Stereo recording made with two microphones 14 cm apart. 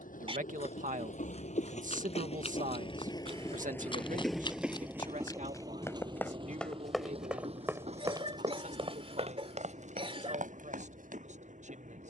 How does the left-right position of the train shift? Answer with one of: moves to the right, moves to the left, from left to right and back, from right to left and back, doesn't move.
moves to the right.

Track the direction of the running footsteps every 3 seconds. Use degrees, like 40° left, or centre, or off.
50° left, 30° left, 10° right, 60° right.